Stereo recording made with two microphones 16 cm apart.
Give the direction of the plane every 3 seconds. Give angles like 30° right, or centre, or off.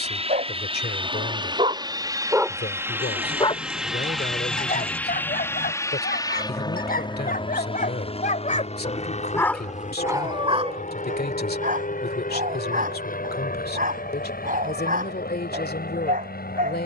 30° right, centre, 30° left, 50° left, 60° left, 60° left.